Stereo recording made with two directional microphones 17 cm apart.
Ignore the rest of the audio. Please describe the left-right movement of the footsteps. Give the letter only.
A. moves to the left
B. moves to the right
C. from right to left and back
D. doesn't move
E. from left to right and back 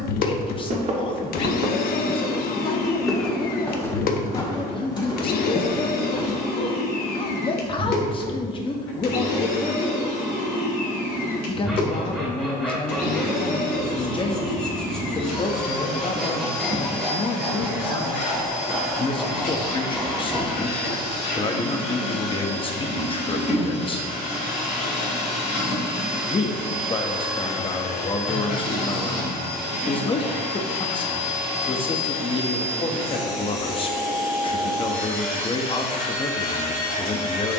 A.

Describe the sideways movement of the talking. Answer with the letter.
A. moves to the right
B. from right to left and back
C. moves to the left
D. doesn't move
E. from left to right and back
D.